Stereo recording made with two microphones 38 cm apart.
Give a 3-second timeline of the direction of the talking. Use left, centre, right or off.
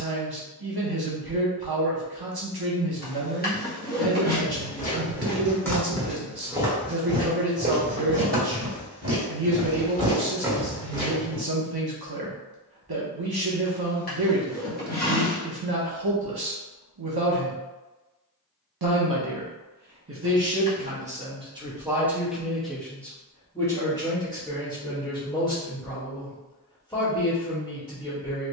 right, right, right, right, right, right, right, centre, centre, centre.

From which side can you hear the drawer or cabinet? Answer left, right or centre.
left.